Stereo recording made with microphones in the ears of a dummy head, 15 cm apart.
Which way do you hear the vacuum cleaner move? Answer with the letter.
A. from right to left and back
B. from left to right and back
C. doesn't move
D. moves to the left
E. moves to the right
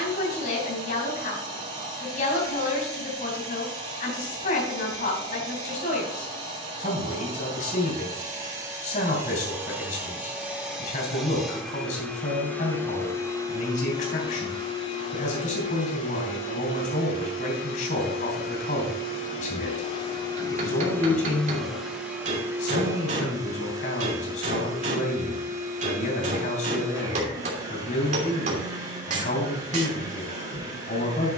A.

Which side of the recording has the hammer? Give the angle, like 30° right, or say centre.
50° right.